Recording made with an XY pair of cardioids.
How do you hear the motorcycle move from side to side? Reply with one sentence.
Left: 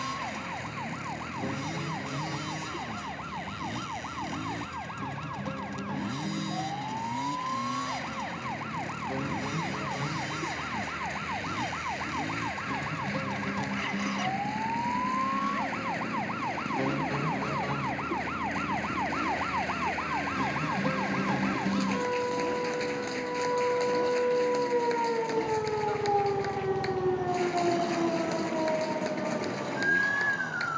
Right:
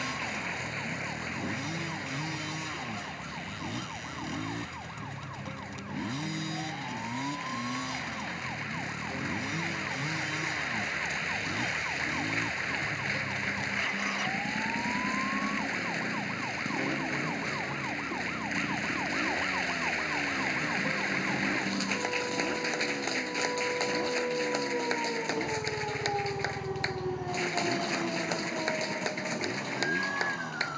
You can hear the motorcycle stay put.